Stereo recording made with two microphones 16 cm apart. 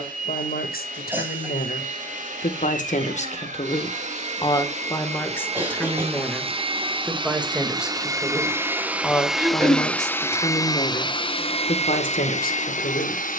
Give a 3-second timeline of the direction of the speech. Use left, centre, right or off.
left, left, centre, left, left.